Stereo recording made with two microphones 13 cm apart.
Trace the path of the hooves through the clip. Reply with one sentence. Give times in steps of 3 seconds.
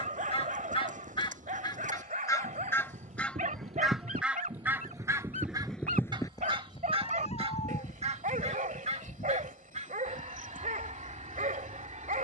You can hear the hooves on the right from 0 s and on the left from 6 s.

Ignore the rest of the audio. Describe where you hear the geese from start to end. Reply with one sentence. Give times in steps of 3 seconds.
You can hear the geese on the left from 0 s, in the centre from 3 s and on the right from 6 s.